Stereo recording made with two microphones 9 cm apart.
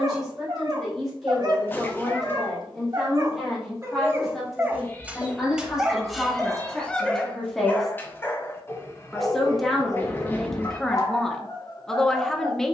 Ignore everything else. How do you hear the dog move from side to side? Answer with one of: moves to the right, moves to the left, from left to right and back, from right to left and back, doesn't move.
moves to the left.